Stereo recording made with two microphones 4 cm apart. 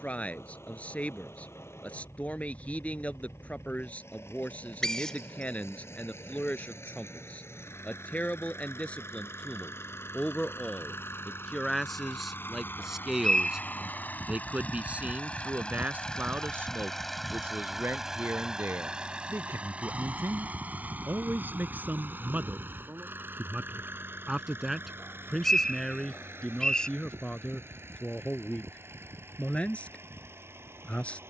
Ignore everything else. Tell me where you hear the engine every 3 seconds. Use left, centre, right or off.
left, left, left, left, left, centre, right, right, right, right, right.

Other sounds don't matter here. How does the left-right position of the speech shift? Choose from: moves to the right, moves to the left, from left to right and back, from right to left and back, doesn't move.
from left to right and back.